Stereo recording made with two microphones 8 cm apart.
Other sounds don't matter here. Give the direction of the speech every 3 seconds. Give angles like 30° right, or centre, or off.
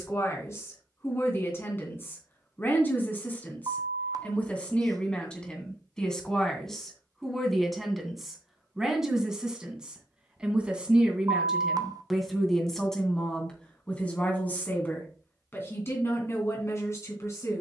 30° left, 20° left, centre, 10° right, 10° left, 40° left.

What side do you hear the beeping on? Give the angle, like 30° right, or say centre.
50° right.